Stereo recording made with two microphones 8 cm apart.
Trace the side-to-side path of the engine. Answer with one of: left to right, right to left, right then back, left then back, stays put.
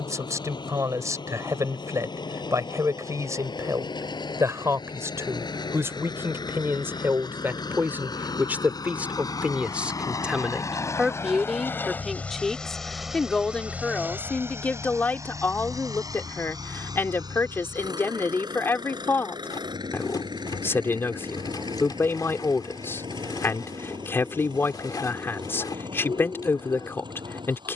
left to right.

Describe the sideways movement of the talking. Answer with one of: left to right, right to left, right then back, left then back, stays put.
right to left.